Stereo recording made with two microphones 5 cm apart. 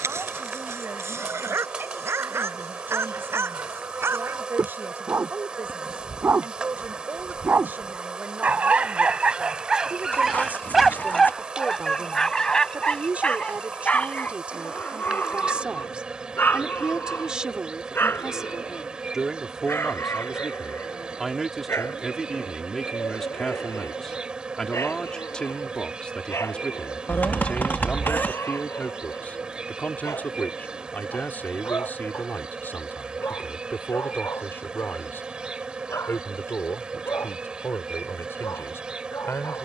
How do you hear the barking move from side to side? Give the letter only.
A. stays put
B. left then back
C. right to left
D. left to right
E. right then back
C.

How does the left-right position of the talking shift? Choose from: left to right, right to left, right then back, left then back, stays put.
right to left.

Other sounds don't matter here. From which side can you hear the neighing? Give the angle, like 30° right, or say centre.
40° left.